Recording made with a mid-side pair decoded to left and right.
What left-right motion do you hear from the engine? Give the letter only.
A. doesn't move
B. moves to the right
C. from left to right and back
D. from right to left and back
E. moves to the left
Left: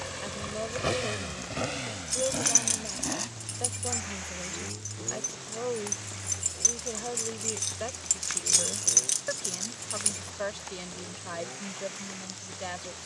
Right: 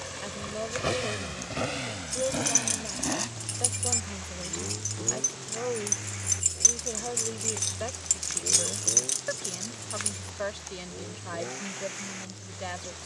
B.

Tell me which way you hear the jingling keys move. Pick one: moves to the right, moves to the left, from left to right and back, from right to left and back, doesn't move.
from left to right and back.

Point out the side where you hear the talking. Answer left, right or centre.
centre.